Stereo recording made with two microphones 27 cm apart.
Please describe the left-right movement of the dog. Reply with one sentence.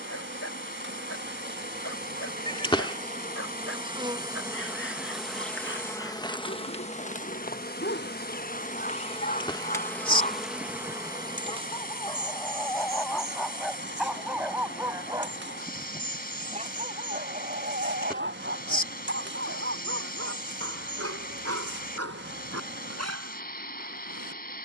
In this clip you hear the dog move from left to right.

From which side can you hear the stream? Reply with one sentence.
You can hear the stream on the left.